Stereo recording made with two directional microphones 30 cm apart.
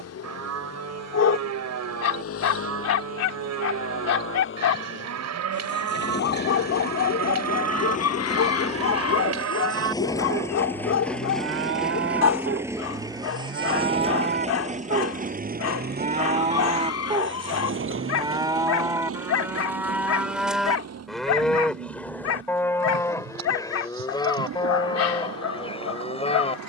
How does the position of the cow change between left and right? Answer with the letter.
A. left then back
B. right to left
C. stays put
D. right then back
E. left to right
B.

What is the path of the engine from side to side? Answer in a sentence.
You can hear the engine go from the left side to the right.